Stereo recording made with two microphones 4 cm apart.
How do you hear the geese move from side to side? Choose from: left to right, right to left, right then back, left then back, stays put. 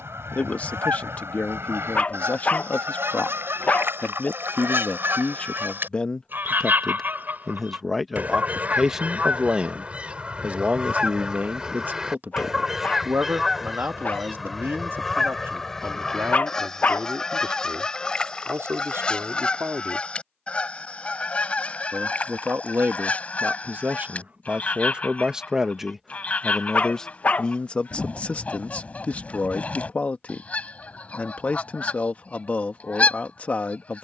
right to left.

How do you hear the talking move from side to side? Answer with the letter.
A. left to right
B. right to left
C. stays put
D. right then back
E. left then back
D.